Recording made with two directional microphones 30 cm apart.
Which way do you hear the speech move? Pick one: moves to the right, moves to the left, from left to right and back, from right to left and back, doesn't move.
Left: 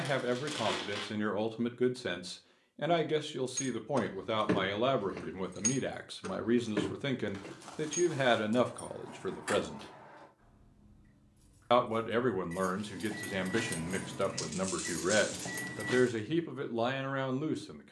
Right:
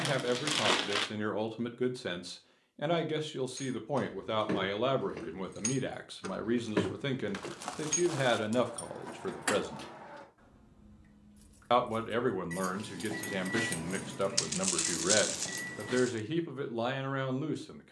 doesn't move.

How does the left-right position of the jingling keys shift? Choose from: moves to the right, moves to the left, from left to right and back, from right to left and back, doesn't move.
from left to right and back.